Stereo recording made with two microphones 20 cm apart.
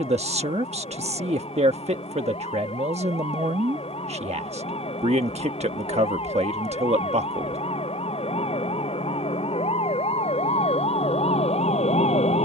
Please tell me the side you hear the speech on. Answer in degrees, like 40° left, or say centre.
30° right.